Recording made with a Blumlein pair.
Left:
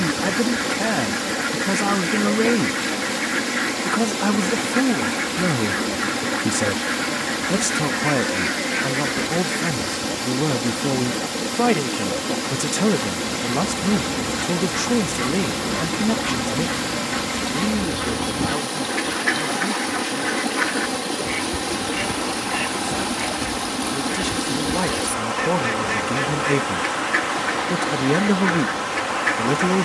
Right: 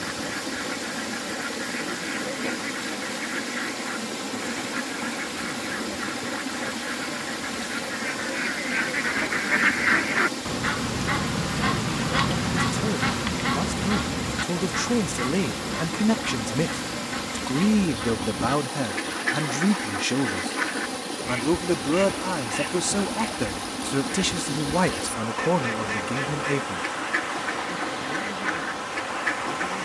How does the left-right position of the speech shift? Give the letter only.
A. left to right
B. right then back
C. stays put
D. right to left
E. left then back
B.